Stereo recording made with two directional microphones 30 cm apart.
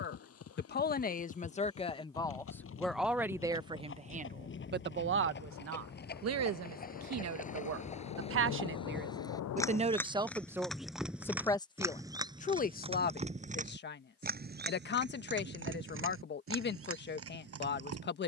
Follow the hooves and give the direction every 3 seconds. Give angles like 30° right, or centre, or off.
50° left, 40° left, 30° left, centre, 20° right, 50° right.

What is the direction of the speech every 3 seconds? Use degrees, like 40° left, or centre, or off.
20° left, 30° right, 50° right, 10° right, 30° left, 40° left.